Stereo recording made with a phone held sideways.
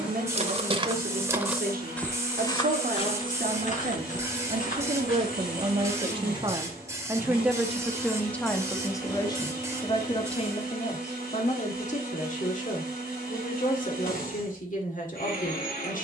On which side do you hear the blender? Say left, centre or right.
left.